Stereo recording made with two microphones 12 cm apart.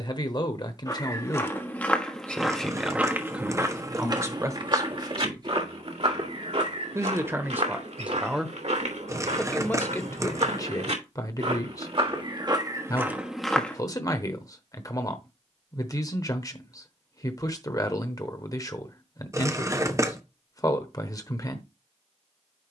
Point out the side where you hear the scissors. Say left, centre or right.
right.